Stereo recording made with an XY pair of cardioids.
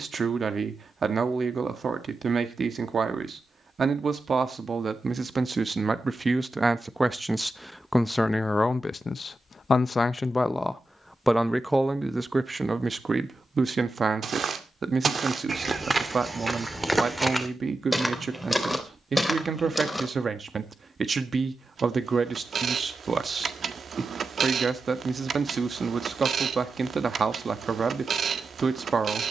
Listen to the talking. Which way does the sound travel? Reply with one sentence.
In this clip you hear the talking move from right to left and back again.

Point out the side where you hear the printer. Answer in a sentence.
In this clip you hear the printer on the right.